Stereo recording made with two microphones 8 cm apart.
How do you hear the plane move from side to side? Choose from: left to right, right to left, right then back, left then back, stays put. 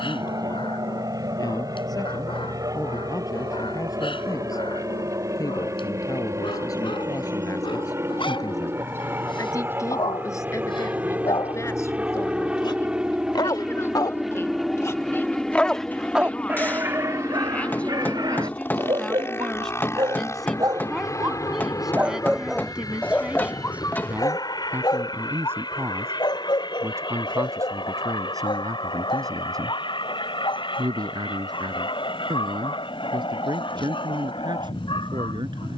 right to left.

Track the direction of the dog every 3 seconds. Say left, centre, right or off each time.
left, left, left, left, left, right, right, centre, left, left, left, left.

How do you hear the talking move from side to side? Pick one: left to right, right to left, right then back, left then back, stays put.
left to right.